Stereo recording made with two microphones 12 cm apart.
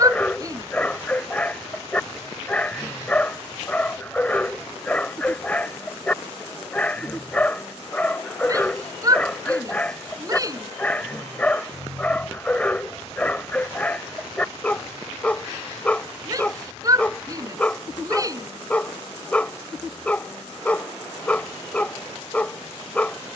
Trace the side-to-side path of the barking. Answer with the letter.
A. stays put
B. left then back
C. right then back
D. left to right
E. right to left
A.